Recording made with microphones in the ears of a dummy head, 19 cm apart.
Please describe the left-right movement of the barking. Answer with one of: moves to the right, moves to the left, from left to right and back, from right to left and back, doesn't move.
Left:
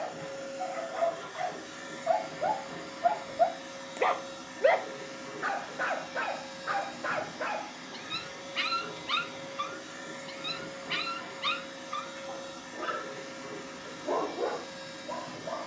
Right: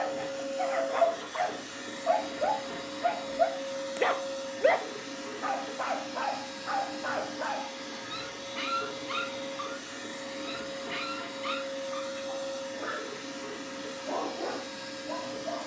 moves to the left.